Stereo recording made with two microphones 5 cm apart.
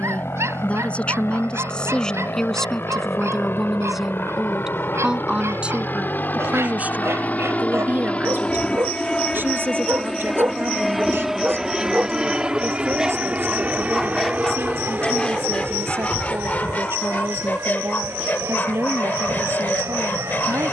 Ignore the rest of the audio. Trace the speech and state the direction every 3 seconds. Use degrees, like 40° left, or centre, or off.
20° left, 10° right, 40° right, 50° right, 60° right, 60° right, 60° right.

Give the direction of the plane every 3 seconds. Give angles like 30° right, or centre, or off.
70° left, 60° left, 30° left, centre, 30° right, 40° right, 50° right.